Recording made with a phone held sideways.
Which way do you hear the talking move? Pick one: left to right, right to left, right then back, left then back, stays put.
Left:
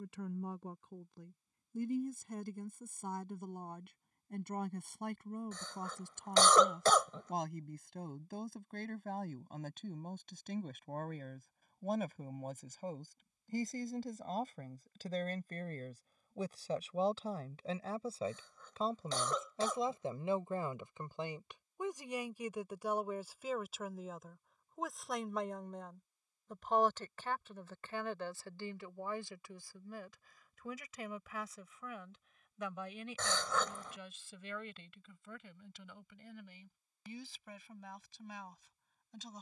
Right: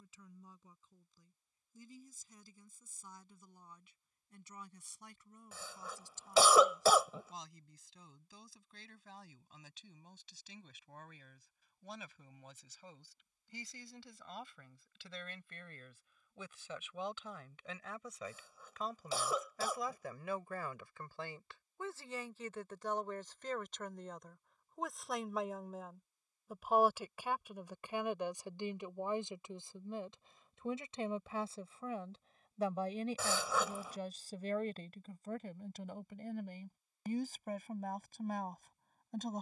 left to right.